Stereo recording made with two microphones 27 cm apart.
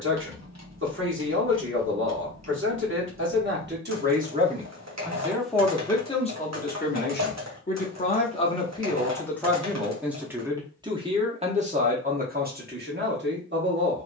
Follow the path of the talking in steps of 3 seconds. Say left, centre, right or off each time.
right, right, left, centre, right.